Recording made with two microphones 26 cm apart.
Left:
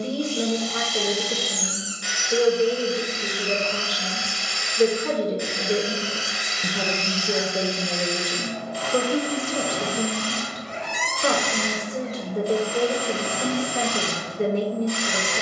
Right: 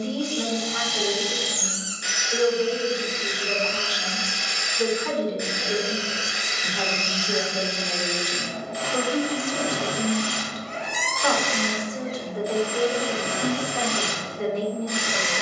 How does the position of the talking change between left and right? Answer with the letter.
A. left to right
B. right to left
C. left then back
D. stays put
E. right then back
D.